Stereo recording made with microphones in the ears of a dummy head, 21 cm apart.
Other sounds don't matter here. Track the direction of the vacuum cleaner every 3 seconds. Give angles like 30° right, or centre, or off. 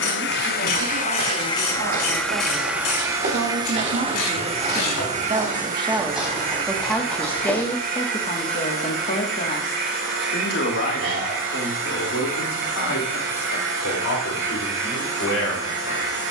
20° left, 30° right, 40° right, 50° right, 50° right, 50° right.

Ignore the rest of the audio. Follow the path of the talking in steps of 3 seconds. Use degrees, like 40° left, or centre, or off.
60° right, 30° right, 10° left, 50° left, 60° left, 70° left.